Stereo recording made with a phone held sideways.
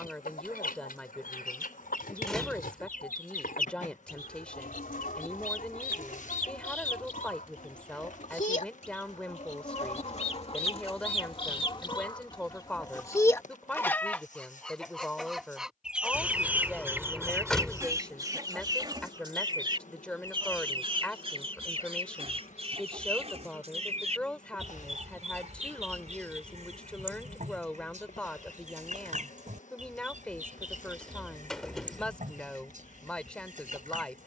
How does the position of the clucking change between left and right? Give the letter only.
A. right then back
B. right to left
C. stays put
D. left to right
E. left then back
D.